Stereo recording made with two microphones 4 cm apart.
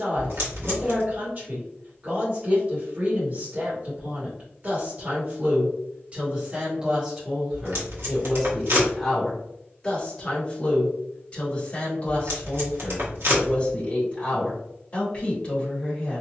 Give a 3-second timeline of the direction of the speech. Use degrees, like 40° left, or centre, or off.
40° right, 40° right, 10° right, 20° left, 30° left, 30° left.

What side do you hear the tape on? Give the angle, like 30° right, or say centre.
70° right.